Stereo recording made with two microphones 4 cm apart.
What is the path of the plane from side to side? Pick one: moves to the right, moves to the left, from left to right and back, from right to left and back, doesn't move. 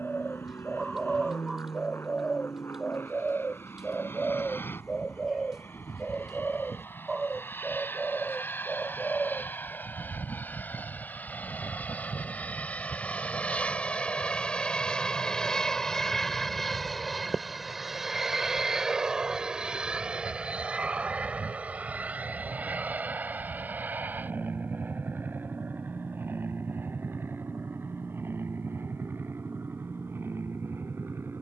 moves to the right.